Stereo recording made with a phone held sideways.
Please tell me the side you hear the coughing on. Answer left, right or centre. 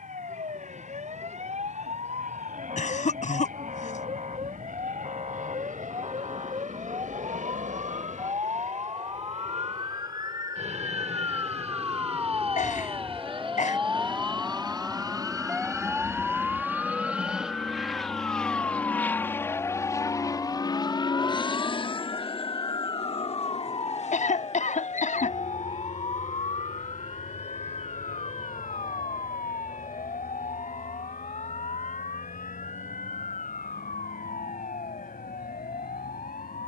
left.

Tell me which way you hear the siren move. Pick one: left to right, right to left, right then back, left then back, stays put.
right to left.